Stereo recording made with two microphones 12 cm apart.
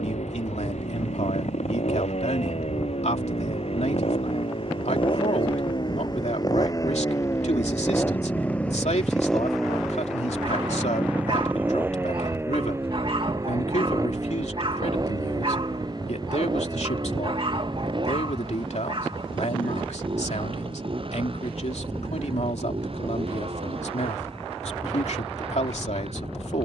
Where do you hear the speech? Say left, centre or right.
left.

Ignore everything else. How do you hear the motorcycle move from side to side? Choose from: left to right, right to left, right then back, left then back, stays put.
left to right.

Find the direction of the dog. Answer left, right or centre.
right.